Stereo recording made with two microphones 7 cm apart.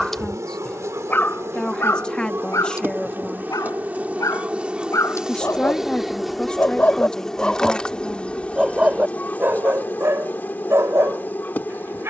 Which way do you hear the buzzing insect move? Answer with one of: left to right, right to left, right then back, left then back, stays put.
right to left.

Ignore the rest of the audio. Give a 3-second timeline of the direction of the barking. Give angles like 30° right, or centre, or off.
30° left, 50° left, 10° left, 40° right.